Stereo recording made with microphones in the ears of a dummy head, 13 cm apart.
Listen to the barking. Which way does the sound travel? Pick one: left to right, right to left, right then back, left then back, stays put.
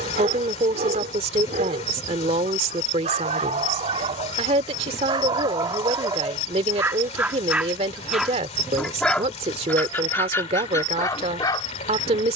right to left.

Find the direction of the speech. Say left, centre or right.
right.